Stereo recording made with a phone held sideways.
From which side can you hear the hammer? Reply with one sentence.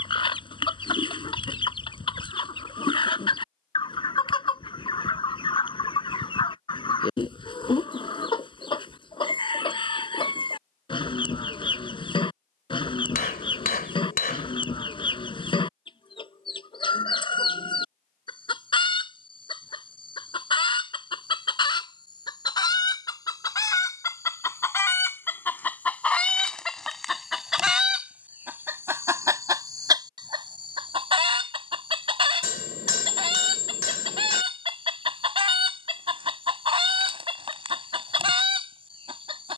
In this clip you hear the hammer on the left.